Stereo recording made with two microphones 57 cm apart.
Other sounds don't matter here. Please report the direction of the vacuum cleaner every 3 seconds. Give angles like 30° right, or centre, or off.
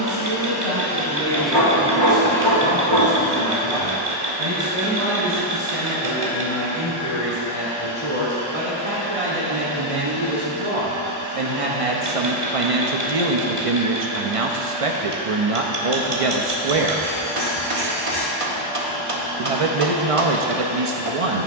centre, 40° right, 60° right, 60° right, 60° right, 60° right, 60° right.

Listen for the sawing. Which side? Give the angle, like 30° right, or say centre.
70° right.